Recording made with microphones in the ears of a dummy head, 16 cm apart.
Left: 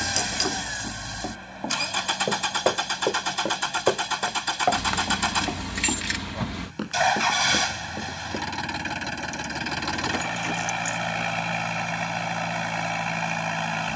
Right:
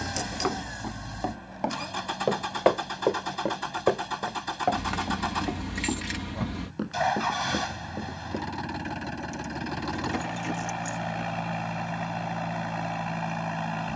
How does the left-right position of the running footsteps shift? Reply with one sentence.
In this clip you hear the running footsteps travel towards the left.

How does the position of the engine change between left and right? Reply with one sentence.
You can hear the engine stay put.